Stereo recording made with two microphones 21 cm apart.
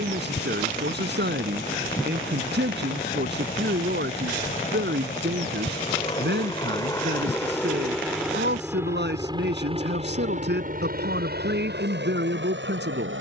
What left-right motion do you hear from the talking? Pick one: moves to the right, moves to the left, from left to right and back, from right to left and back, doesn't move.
doesn't move.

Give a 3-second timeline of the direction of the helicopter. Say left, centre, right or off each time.
left, left, centre, right, right.